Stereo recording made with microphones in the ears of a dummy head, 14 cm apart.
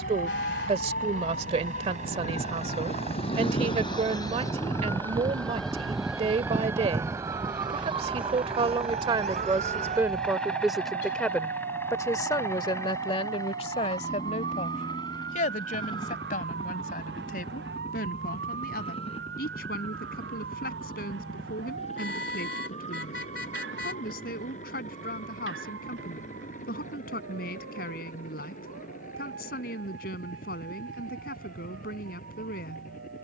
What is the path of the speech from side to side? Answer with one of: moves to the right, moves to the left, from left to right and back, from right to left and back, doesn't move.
moves to the left.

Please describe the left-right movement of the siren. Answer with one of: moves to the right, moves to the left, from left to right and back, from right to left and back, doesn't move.
moves to the right.